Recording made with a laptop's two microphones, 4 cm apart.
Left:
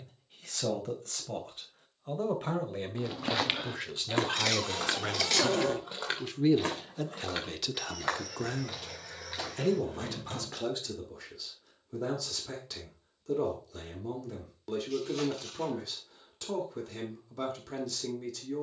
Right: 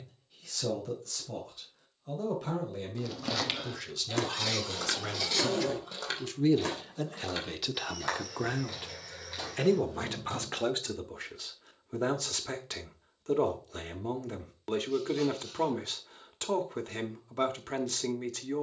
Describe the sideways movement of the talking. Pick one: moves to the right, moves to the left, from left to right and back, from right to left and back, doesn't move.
moves to the right.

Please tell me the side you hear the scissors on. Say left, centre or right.
left.